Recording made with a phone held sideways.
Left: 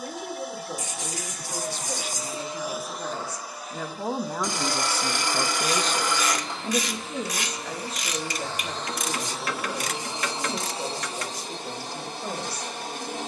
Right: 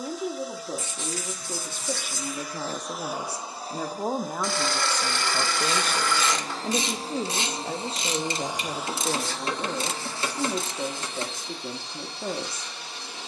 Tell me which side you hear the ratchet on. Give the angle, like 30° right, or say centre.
30° right.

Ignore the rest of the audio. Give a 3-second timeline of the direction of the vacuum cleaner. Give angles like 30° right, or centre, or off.
50° left, 40° right, 30° right, 30° left, 50° left.